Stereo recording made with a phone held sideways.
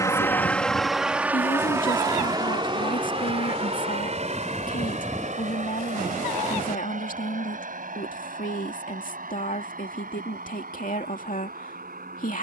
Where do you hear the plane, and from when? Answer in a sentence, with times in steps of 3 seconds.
You can hear the plane in the centre from 0 s and on the right from 3 s.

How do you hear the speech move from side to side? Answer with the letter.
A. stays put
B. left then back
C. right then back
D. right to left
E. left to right
A.